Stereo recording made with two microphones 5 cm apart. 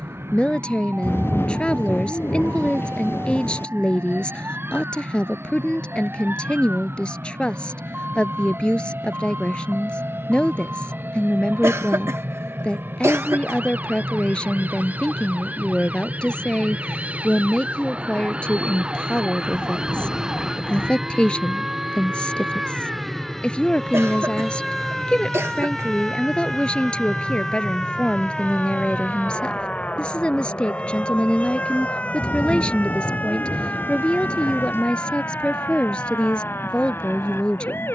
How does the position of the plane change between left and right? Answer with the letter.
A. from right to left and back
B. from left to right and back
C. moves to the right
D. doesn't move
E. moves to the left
E.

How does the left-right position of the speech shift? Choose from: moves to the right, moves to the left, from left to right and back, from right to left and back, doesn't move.
doesn't move.